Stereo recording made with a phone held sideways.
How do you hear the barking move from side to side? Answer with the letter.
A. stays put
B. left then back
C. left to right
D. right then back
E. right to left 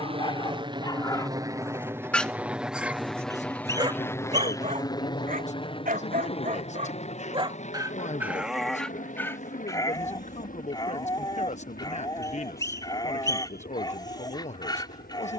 D.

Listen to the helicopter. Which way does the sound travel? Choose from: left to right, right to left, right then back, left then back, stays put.
right to left.